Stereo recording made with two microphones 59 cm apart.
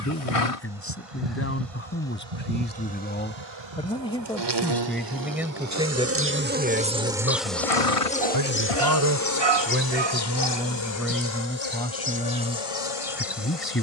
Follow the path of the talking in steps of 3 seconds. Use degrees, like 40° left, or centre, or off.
20° left, centre, 20° right, 10° right, 20° left.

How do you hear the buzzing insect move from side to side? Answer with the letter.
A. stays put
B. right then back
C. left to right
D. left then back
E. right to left
E.